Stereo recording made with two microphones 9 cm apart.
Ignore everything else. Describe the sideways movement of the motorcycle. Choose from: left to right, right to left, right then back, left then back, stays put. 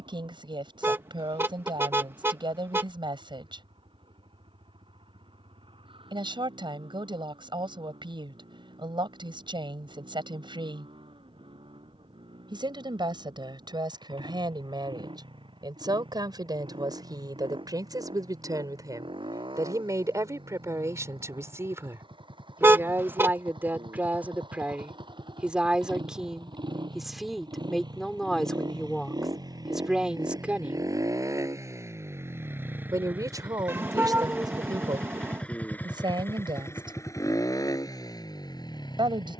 right to left.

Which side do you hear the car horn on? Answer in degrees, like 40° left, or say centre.
30° right.